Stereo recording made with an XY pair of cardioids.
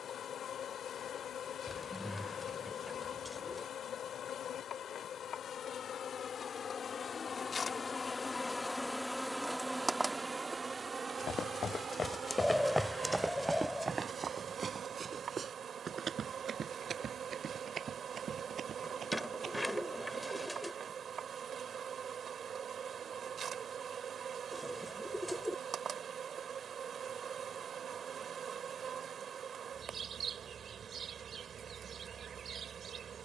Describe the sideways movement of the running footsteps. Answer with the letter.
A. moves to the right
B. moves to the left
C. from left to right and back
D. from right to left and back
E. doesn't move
A.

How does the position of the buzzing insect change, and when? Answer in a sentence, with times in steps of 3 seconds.
You can hear the buzzing insect on the left from 0 s and on the right from 9 s.